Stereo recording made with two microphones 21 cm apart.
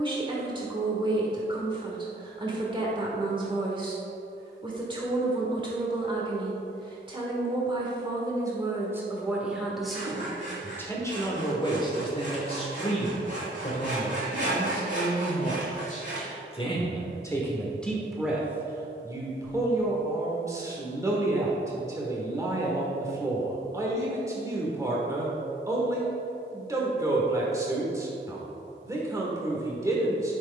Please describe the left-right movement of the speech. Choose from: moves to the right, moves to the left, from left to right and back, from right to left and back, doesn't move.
from right to left and back.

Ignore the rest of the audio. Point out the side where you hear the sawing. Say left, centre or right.
right.